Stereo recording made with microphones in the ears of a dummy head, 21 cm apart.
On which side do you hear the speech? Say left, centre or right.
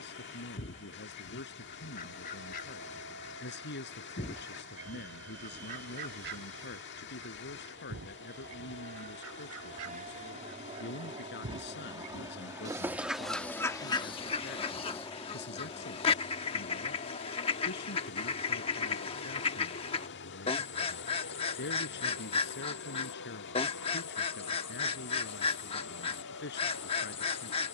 left.